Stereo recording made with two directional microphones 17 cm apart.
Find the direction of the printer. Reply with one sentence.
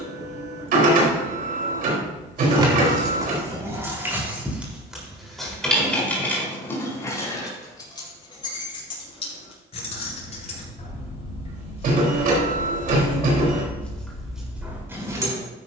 You can hear the printer on the right.